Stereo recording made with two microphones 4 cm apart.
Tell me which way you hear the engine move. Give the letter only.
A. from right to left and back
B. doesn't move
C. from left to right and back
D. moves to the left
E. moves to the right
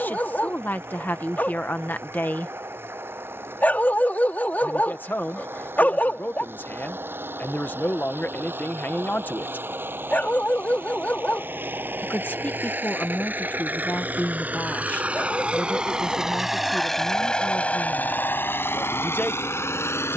D.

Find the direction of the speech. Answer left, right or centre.
left.